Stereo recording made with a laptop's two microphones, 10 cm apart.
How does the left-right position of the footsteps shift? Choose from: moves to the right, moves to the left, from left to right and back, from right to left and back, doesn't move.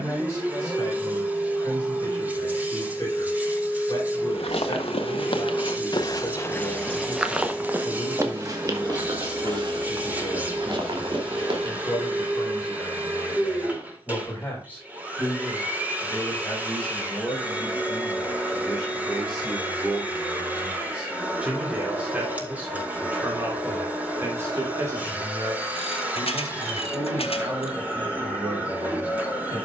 moves to the right.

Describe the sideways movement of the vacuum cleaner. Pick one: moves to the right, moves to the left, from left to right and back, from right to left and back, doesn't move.
doesn't move.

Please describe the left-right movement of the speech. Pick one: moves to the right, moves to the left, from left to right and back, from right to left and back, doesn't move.
moves to the right.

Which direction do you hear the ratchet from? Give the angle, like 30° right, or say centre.
80° left.